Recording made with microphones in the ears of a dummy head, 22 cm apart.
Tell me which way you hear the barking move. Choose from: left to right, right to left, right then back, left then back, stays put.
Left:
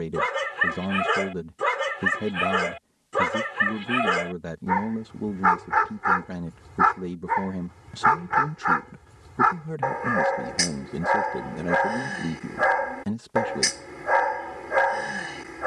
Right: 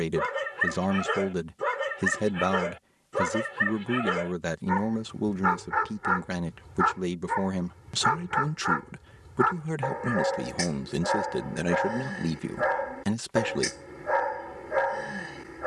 stays put.